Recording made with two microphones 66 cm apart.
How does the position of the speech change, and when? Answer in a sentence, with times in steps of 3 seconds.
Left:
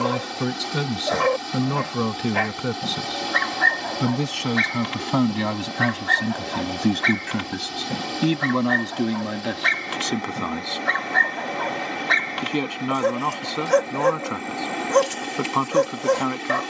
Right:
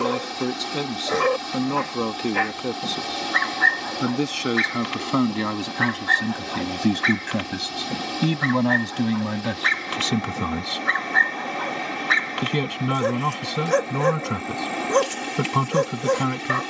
In this clip you hear the speech on the left from 0 s, in the centre from 6 s and on the right from 9 s.